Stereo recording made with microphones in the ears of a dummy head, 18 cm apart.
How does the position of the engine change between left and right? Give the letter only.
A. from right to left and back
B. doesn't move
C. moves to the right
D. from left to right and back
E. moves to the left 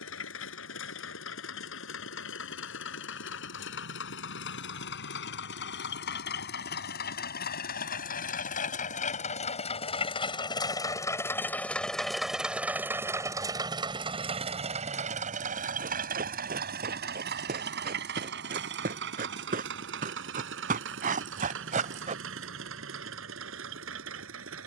C.